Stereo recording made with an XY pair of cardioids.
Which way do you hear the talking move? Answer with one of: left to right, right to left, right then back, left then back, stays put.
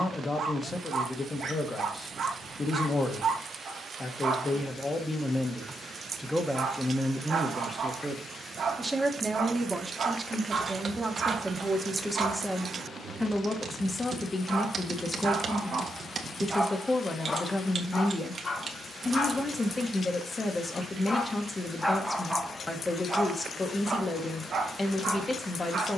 right then back.